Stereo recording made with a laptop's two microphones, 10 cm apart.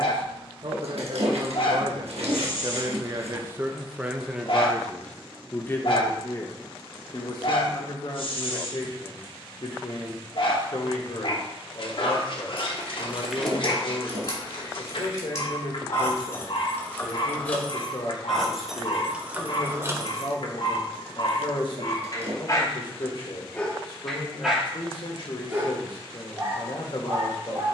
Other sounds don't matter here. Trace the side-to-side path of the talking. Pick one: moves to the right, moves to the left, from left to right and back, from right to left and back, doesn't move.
moves to the left.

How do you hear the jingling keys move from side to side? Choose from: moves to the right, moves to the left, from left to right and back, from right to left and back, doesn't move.
from right to left and back.